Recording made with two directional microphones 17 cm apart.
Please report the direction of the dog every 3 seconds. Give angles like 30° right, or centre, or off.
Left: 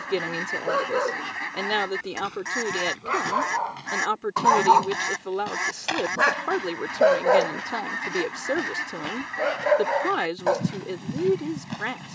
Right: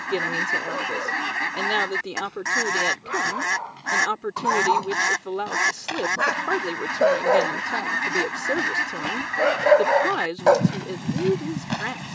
40° left, 30° left, centre, 30° right.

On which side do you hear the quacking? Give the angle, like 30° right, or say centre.
30° right.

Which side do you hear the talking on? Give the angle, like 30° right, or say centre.
centre.